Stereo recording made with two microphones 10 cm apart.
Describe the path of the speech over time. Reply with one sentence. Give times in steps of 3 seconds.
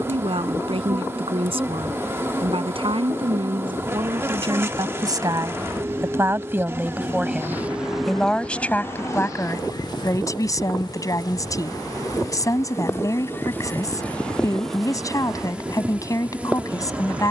You can hear the speech on the right from 0 s, in the centre from 6 s and on the left from 9 s.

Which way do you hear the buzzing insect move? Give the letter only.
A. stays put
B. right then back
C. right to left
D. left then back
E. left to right
D.